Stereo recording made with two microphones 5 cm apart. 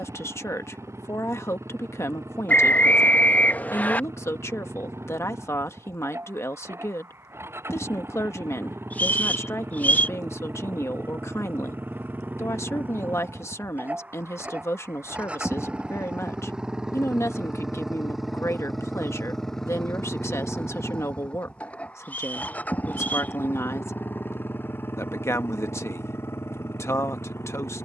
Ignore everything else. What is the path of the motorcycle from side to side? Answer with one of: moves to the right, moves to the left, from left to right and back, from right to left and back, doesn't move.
moves to the left.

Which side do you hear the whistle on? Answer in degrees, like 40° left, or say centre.
30° left.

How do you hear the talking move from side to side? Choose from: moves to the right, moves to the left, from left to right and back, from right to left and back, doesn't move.
doesn't move.